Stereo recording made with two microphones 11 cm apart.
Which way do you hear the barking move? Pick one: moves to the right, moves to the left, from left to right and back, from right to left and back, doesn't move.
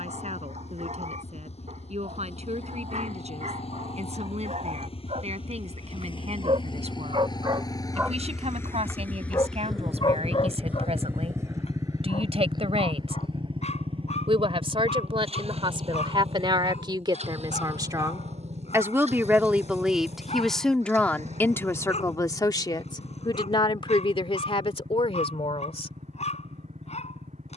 moves to the left.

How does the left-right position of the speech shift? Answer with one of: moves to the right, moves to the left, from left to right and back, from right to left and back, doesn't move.
moves to the left.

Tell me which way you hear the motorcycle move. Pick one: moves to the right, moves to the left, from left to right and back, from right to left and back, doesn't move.
moves to the right.